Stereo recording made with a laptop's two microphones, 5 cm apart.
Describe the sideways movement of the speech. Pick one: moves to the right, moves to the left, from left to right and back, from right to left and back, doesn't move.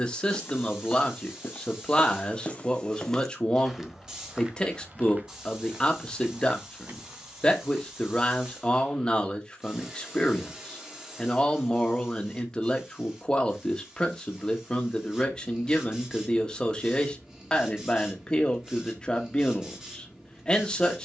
doesn't move.